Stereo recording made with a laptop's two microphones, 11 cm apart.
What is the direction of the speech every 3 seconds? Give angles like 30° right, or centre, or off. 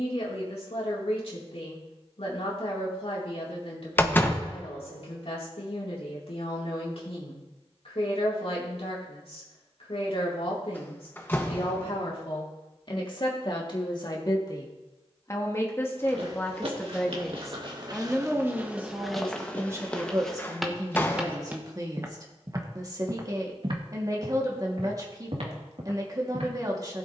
60° left, 60° left, 60° left, 60° left, 40° left, 10° left, 20° right, 30° right, 30° right.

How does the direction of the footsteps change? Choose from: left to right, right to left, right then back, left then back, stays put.
left then back.